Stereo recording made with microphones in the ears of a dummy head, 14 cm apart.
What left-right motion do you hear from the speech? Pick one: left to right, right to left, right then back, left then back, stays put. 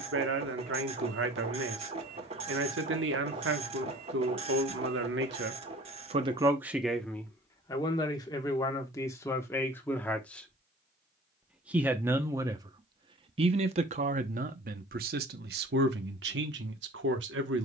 left then back.